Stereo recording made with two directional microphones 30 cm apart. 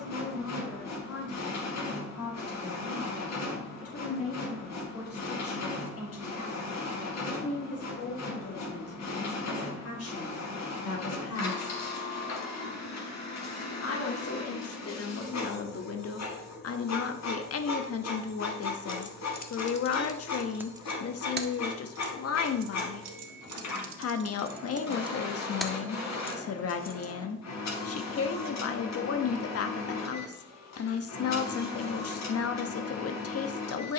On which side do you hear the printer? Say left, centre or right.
left.